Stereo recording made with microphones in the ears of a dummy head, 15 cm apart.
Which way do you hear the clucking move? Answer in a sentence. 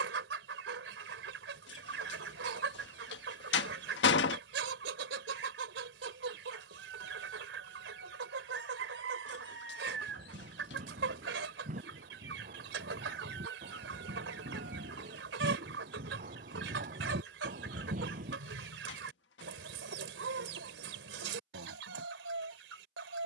You can hear the clucking stay in one place.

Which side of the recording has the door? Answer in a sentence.
You can hear the door on the left.